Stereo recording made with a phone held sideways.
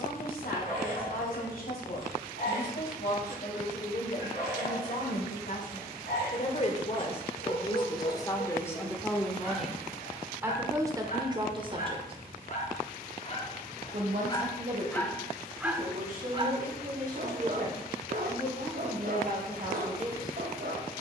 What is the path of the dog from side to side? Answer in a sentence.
In this clip you hear the dog travel towards the right.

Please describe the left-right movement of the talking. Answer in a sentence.
In this clip you hear the talking move to the right.